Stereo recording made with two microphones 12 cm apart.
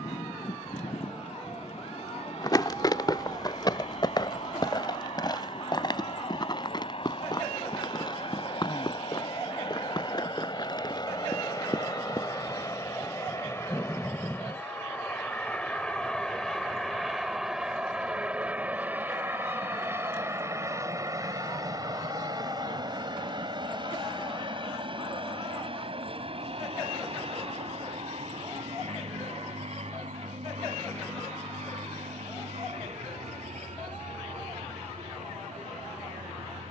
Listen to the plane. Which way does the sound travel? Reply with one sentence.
In this clip you hear the plane move from left to right.